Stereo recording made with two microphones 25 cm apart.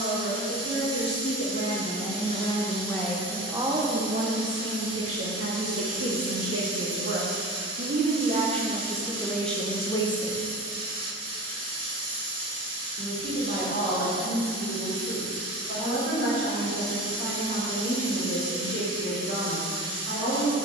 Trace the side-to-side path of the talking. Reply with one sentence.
In this clip you hear the talking move from left to right and back again.